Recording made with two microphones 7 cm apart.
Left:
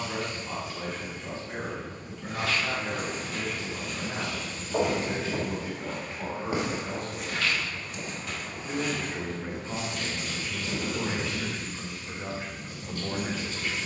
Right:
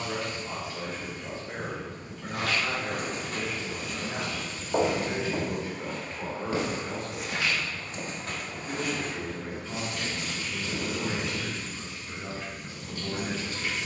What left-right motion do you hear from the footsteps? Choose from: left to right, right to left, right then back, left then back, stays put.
left then back.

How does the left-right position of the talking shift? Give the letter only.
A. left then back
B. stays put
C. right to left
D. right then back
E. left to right
C.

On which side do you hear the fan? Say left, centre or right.
centre.